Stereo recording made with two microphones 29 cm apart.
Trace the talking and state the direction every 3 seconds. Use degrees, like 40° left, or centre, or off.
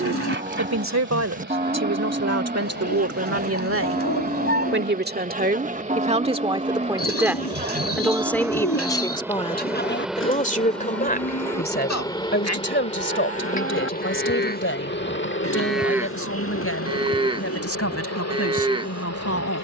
60° right, 40° right, centre, 30° left, 40° left, 50° left, 50° left.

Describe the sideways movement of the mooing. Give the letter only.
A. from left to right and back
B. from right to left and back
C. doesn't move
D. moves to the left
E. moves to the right
B.